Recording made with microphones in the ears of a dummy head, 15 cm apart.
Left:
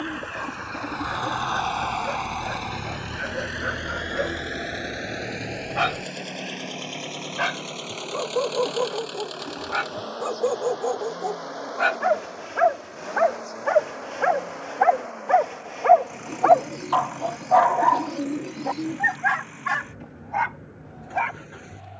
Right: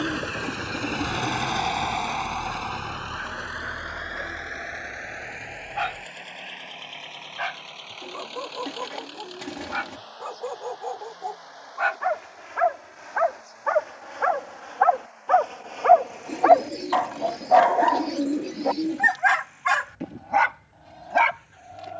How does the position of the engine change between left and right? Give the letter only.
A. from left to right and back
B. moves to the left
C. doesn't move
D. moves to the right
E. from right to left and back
B.